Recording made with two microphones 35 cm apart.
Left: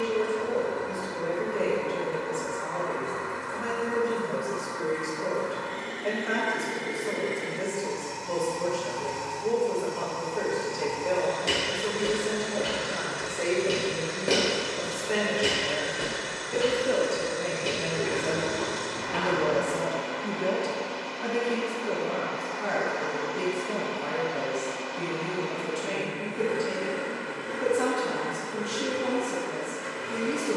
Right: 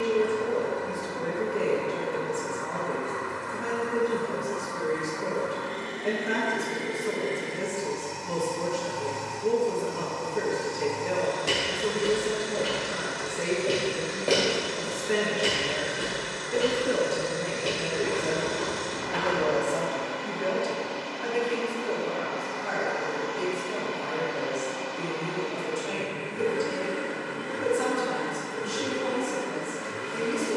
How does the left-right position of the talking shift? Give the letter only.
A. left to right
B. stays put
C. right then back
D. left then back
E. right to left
E.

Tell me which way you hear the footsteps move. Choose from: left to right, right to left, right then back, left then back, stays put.
right to left.